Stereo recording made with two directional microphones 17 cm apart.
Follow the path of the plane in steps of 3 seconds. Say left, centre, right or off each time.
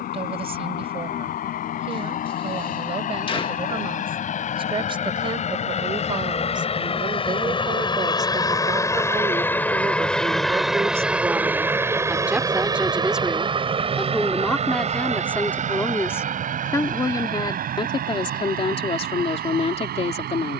left, left, left, centre, right, right, right.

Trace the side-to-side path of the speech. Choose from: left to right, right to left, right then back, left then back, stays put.
right to left.